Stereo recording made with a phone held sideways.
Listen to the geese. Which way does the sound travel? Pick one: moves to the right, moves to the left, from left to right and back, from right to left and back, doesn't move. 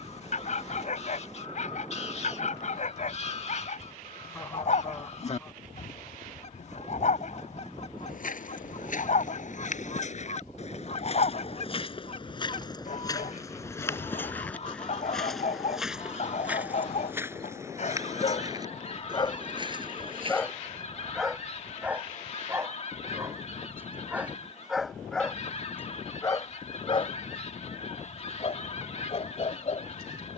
doesn't move.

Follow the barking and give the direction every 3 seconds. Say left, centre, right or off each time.
left, left, left, left, left, left, left, centre, centre, left.